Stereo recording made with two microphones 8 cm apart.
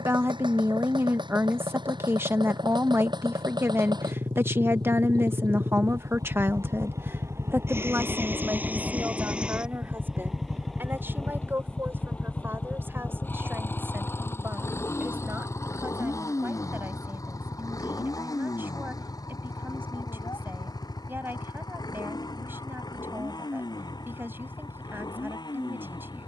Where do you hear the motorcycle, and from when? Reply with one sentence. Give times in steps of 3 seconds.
You can hear the motorcycle on the right from 0 s, in the centre from 9 s and on the left from 12 s.